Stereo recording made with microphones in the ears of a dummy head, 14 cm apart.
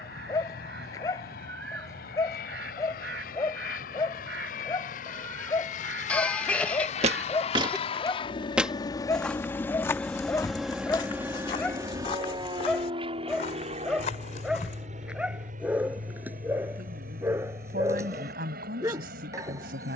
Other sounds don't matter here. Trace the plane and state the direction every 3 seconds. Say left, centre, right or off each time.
left, left, left, centre, right, right, right.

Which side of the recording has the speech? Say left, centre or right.
right.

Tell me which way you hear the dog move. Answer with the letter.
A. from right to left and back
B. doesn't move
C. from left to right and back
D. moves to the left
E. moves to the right
E.